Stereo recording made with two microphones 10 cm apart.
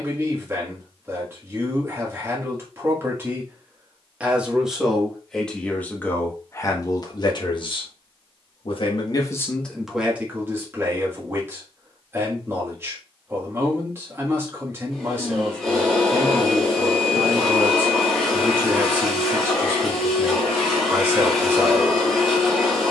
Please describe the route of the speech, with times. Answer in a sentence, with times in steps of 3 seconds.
You can hear the speech on the right from 0 s, in the centre from 3 s, on the left from 6 s, in the centre from 9 s and on the right from 12 s.